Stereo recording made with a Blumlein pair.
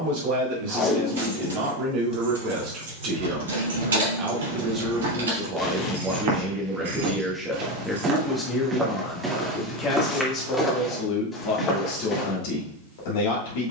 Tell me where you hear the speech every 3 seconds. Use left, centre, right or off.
right, right, centre, left, left.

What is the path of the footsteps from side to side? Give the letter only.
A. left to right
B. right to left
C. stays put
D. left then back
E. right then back
B.